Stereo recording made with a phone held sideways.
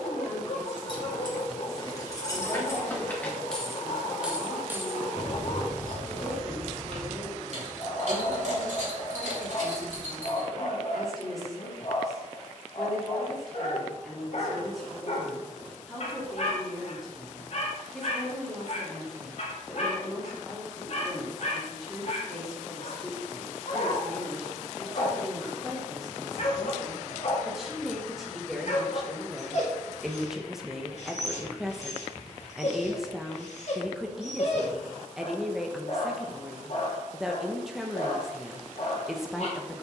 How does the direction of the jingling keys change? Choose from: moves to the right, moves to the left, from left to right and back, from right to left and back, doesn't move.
moves to the right.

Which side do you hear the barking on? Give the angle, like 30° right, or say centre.
50° left.